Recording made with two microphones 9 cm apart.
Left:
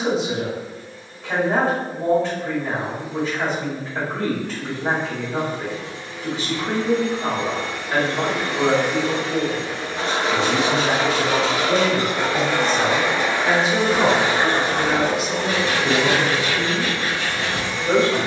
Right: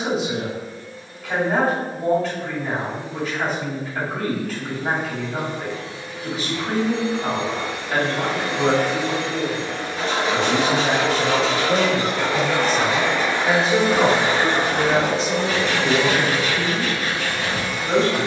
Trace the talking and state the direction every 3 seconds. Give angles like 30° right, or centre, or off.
30° left, 30° left, 30° left, 20° left, centre, 20° left.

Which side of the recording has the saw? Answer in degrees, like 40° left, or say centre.
40° left.